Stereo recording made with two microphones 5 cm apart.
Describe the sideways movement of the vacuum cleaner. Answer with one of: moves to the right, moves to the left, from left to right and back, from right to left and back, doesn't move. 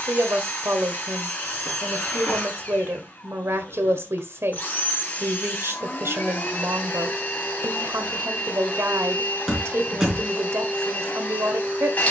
doesn't move.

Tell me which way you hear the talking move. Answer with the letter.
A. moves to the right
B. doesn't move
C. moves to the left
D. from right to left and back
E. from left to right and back
B.